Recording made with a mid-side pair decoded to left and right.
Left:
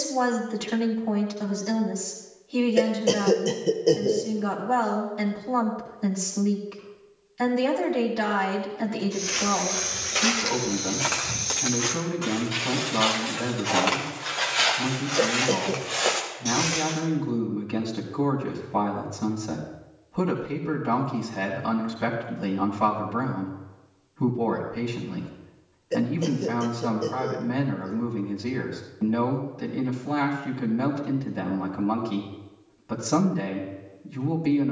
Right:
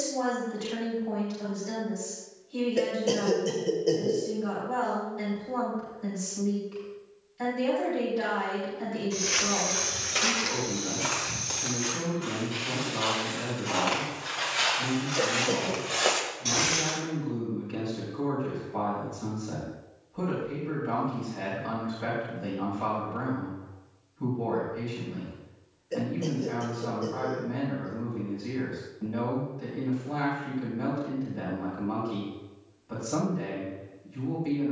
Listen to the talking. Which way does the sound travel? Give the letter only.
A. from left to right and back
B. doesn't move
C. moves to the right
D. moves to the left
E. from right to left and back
B.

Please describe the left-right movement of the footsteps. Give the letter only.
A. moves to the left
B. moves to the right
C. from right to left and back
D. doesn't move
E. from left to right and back
C.